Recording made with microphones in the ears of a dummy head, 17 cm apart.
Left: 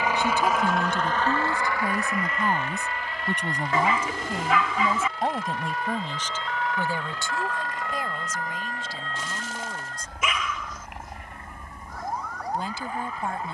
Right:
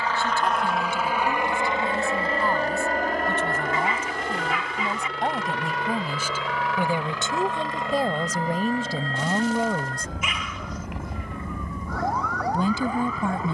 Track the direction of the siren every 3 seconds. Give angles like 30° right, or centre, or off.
40° left, 20° left, 20° right, 40° right, 60° right.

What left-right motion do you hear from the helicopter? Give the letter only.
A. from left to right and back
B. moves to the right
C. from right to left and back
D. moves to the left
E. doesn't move
B.